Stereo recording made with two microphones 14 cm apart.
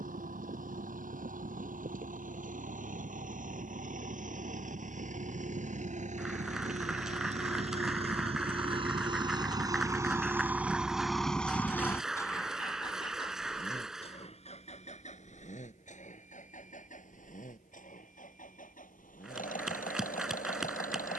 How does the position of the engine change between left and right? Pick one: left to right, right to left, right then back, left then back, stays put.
right to left.